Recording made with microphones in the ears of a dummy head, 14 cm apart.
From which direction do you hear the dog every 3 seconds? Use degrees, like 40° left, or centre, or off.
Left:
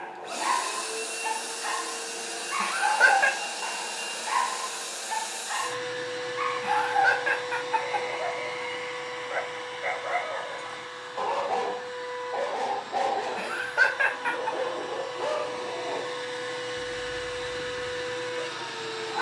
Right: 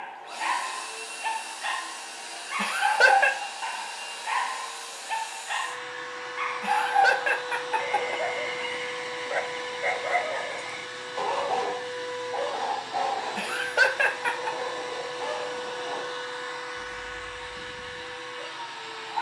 30° right, 30° right, 30° right, 20° right, 40° left, 60° left, 70° left.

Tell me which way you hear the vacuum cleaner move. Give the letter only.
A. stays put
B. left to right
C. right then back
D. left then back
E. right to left
C.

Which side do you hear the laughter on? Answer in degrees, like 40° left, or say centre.
40° right.